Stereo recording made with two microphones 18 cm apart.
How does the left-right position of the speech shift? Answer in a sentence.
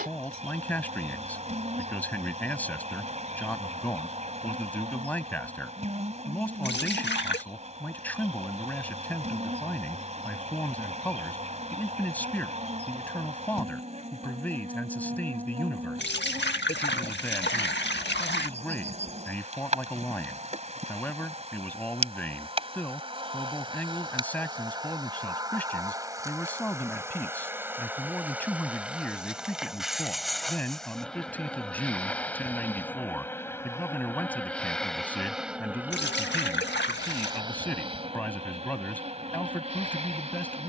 In this clip you hear the speech stay in one place.